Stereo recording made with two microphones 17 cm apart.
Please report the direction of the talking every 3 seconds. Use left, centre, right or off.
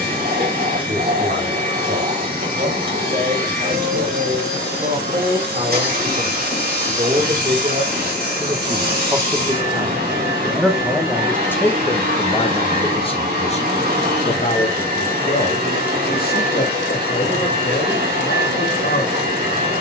right, right, right, centre, left, left, left.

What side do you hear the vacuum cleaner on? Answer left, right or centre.
right.